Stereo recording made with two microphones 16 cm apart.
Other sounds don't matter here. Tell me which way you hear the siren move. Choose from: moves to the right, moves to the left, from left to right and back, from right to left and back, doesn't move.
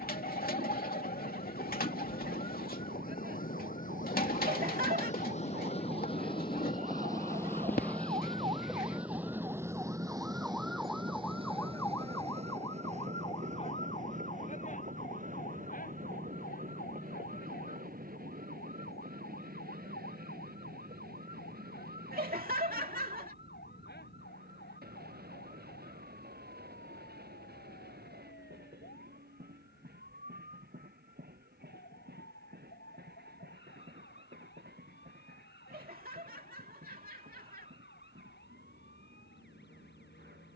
moves to the left.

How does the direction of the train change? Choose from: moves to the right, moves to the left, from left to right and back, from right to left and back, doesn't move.
moves to the right.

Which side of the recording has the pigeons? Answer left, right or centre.
left.